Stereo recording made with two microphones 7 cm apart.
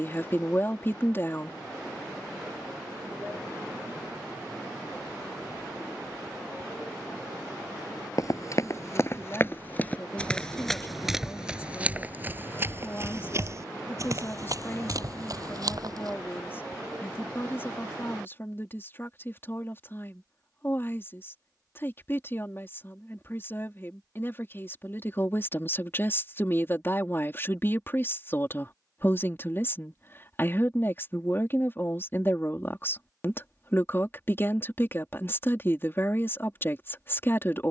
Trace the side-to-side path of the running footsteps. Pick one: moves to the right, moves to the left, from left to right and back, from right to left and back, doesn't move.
moves to the right.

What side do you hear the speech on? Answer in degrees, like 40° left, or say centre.
30° left.